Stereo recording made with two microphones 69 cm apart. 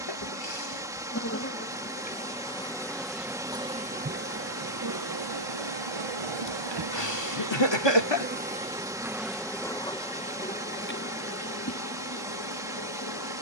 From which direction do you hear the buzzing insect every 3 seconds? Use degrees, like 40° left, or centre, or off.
20° left, 20° right, 30° right, 10° left, 30° left.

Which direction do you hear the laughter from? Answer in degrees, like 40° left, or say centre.
40° left.